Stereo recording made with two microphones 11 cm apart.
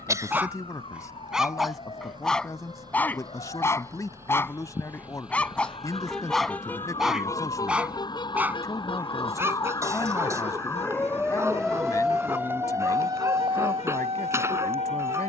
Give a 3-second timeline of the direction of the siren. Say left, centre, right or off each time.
left, left, left, left, right.